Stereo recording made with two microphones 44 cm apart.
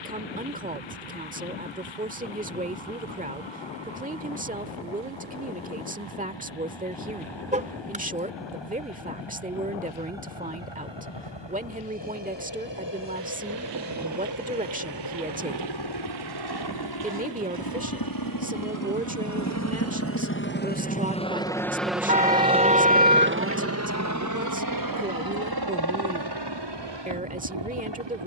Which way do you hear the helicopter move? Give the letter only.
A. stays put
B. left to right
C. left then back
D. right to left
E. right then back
B.